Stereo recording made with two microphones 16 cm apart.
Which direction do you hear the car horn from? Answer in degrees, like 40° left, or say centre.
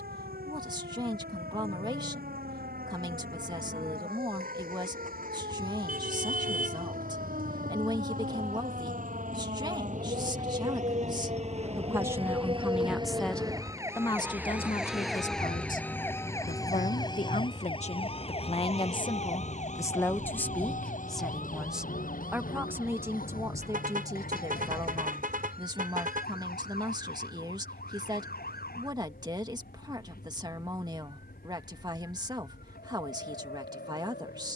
60° right.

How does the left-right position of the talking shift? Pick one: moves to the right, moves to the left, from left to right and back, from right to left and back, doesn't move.
from right to left and back.